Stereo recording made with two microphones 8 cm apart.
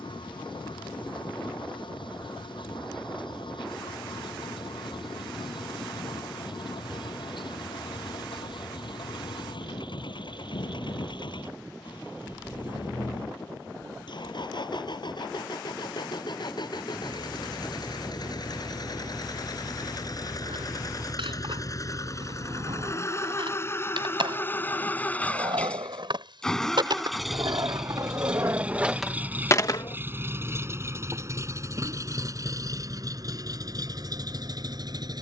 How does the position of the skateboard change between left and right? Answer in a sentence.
In this clip you hear the skateboard move from right to left.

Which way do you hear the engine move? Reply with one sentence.
You can hear the engine move from left to right.